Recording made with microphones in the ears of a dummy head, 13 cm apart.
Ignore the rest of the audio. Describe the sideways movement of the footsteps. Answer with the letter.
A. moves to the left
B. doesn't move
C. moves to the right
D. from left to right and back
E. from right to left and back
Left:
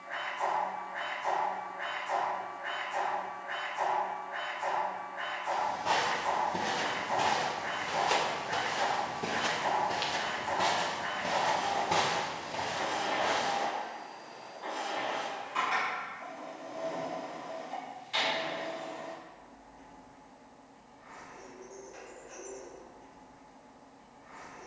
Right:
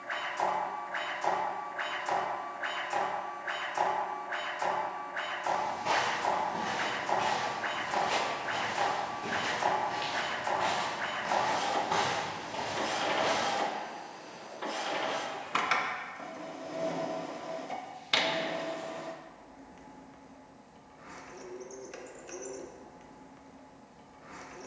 E.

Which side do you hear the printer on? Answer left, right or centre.
right.